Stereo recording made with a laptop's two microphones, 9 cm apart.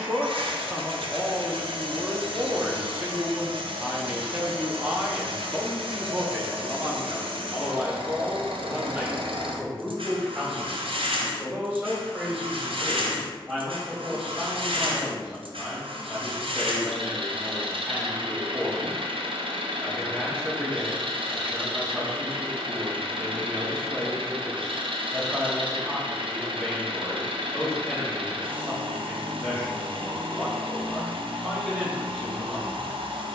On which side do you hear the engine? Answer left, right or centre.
right.